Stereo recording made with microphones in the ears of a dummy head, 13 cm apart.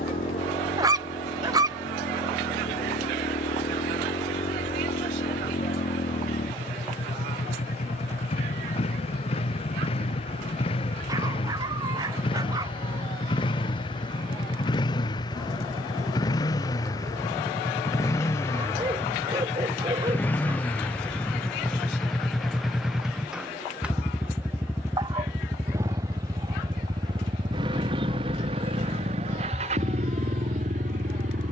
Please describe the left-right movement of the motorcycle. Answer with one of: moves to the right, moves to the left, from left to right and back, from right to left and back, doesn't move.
moves to the right.